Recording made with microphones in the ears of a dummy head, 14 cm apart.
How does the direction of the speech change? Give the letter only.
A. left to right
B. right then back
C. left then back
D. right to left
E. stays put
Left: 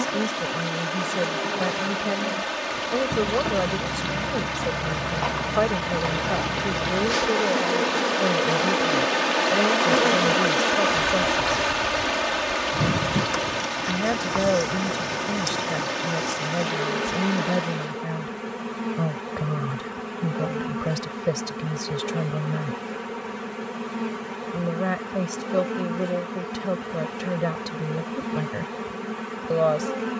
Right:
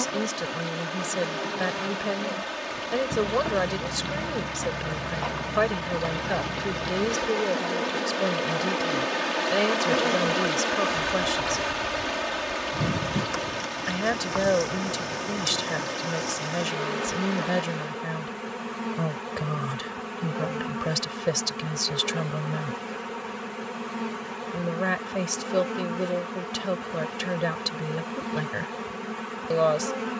E.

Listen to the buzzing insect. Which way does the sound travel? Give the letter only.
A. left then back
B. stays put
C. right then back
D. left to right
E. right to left
A.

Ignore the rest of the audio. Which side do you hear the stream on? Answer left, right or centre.
centre.